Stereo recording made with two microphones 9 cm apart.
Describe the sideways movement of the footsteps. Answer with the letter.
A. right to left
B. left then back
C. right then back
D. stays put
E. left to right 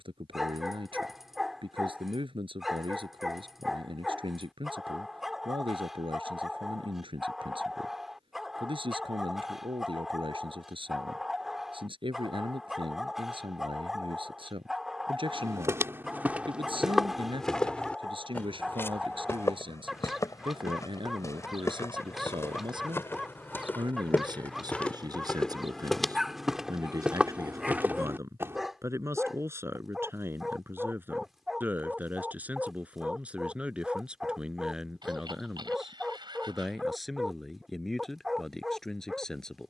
B.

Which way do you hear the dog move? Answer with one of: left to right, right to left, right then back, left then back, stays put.
stays put.